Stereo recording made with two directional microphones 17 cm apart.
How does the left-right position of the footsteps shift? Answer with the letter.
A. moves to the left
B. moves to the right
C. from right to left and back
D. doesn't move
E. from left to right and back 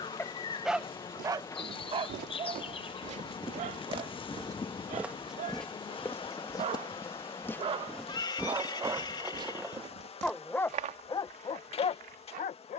C.